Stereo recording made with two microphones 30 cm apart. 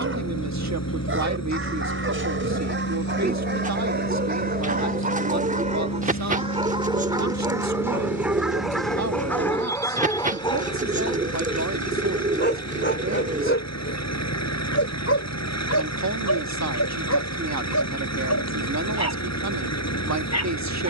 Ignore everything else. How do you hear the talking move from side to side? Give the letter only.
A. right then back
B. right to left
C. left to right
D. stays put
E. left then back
D.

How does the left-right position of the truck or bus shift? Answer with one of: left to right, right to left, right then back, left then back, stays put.
stays put.